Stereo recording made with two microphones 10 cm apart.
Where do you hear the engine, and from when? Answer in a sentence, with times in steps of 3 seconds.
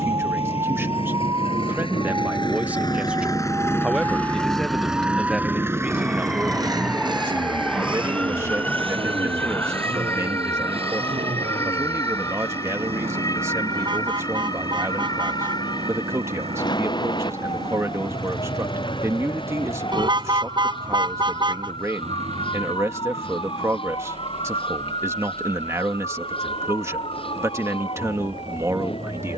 In this clip you hear the engine on the left from 0 s, in the centre from 3 s and on the right from 6 s.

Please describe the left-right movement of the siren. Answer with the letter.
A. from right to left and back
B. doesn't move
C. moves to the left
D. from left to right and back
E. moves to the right
C.